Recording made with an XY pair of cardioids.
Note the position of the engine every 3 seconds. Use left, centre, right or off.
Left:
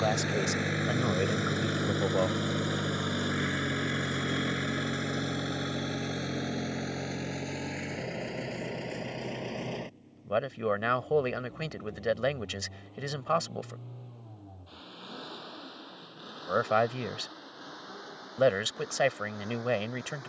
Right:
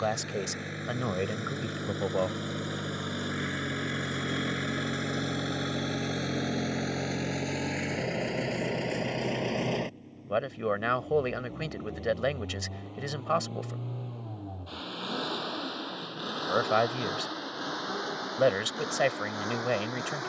left, centre, right, right, right, right, right.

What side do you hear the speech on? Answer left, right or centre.
centre.